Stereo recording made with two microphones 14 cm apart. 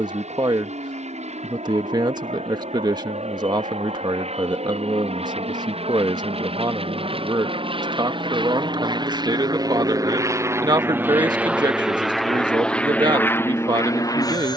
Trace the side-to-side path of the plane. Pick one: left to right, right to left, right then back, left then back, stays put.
right to left.